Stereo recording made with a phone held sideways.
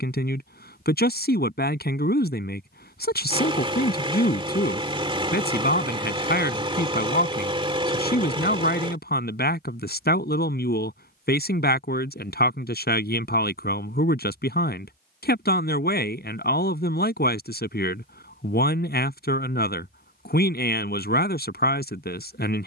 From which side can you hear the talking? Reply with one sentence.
You can hear the talking on the left.